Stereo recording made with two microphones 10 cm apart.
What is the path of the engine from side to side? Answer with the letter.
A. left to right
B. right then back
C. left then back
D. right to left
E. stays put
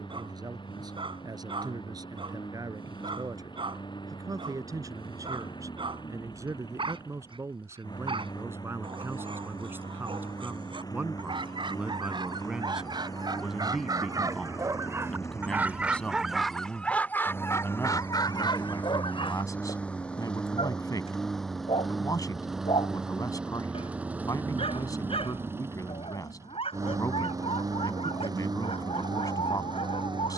A.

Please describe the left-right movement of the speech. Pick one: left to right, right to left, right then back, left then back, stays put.
right to left.